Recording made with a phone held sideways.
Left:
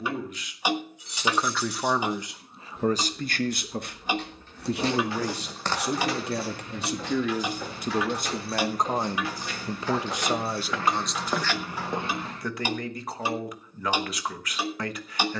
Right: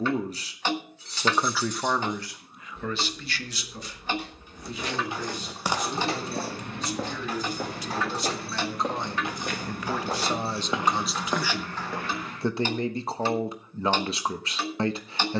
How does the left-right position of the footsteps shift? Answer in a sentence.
In this clip you hear the footsteps go right and come back.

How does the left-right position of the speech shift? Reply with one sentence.
You can hear the speech move from right to left and back again.